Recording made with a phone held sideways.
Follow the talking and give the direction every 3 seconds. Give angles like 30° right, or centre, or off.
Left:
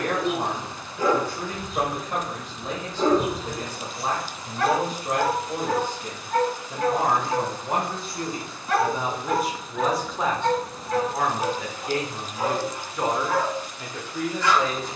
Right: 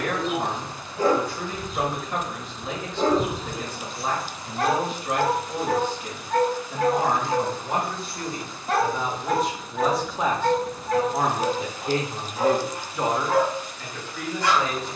40° left, 40° left, 30° left, 10° right, 10° left.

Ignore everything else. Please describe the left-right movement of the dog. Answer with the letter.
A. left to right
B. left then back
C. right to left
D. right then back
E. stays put
E.